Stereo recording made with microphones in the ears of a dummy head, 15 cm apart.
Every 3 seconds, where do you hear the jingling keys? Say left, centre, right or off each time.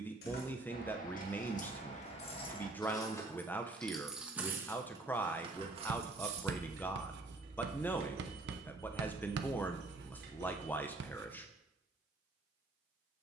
left, centre, right, right, off.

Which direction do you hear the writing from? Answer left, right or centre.
right.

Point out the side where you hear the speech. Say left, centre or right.
centre.